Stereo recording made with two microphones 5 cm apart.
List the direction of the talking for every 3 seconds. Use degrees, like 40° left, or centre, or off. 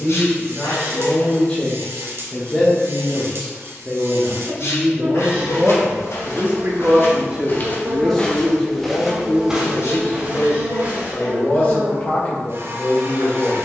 20° left, 10° right, 10° right, 30° left, 30° left.